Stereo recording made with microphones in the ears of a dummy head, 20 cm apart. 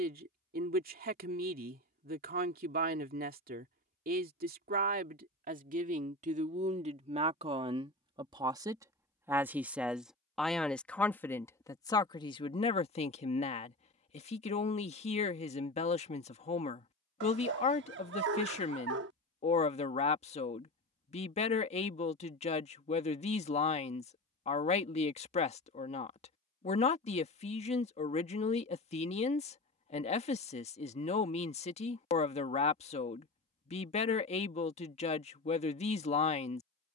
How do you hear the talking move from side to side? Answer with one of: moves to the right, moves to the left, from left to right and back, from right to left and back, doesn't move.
moves to the left.